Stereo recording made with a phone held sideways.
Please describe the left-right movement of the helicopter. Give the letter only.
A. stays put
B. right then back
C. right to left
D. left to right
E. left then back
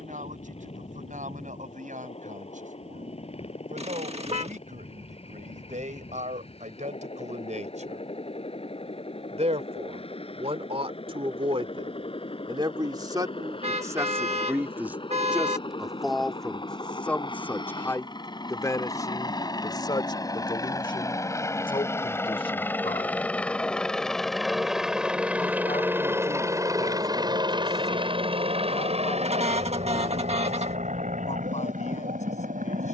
D.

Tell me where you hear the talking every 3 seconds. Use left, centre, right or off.
right, right, right, right, right, centre, left, left, left, left, left.